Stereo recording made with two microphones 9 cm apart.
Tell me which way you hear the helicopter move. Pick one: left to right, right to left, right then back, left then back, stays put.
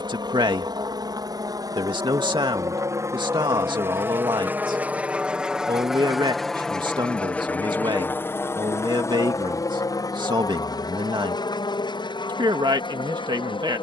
right to left.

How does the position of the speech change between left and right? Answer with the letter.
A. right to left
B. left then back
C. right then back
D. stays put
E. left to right
D.